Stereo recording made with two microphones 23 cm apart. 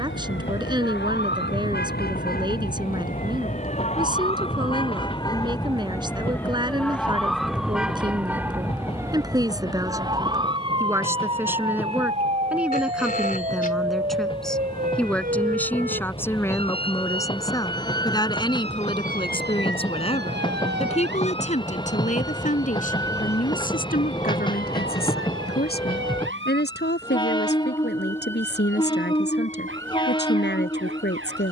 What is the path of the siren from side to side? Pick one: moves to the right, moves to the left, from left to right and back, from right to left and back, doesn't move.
moves to the right.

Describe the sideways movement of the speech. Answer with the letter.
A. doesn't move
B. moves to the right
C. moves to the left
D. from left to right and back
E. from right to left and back
C.